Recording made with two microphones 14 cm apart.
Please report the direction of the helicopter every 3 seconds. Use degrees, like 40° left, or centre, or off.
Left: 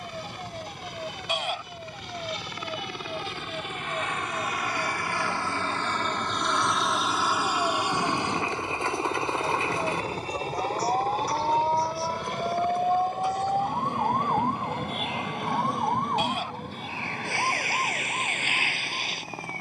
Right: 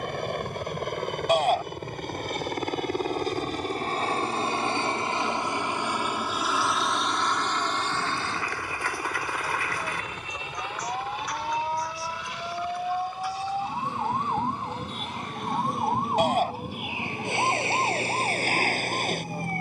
60° right, 30° right, 10° left, 30° left, 50° left, 60° left, 60° left.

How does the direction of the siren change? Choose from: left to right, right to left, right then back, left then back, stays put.
left to right.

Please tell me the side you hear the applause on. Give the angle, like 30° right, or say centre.
20° left.